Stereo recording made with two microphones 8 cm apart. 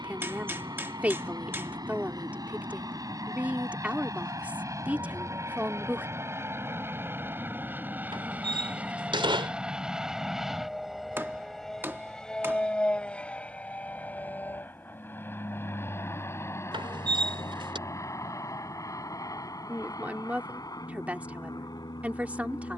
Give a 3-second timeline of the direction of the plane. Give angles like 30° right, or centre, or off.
50° right, 40° right, 20° right, centre, 20° left, 30° left, 40° left, 50° left.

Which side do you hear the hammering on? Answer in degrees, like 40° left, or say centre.
30° right.